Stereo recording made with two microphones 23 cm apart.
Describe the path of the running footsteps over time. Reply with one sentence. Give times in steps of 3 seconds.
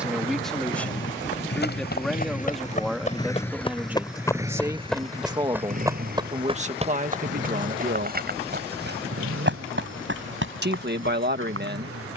You can hear the running footsteps on the left from 0 s, in the centre from 3 s and on the right from 6 s.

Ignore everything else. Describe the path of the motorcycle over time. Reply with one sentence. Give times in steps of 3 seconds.
In this clip you hear the motorcycle on the left from 0 s, in the centre from 3 s and on the right from 6 s.